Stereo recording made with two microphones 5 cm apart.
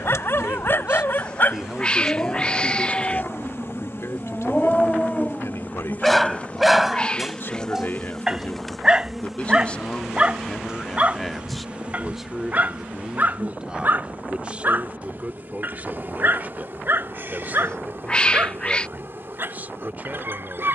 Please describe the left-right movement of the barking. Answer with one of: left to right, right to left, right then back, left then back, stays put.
left to right.